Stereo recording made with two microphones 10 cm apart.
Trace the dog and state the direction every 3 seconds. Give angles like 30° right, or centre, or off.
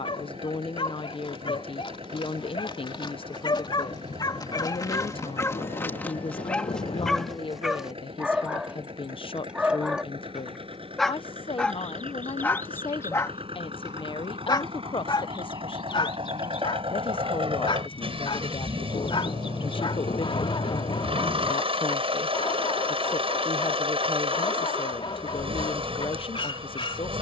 70° left, 40° left, centre, centre, 30° left, 60° left, 70° left, 70° left, 70° left.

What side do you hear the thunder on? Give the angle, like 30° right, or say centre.
80° left.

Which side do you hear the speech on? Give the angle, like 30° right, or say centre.
70° left.